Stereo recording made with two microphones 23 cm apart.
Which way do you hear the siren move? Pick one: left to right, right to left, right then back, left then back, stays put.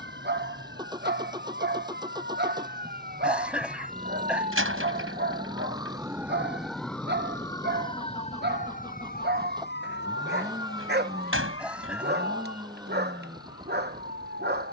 right to left.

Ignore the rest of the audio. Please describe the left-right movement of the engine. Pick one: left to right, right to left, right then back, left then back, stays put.
stays put.